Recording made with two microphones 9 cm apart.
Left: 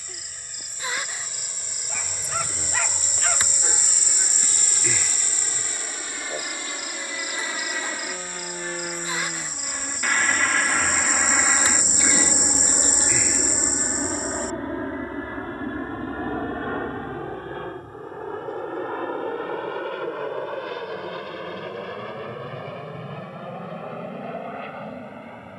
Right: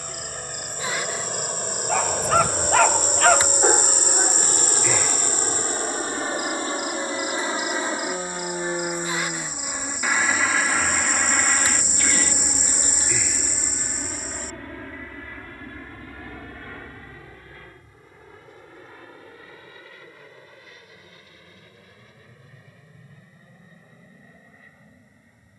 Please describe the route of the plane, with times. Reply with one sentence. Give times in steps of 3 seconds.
You can hear the plane on the right from 0 s, in the centre from 9 s and on the left from 12 s.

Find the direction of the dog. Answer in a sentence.
In this clip you hear the dog on the right.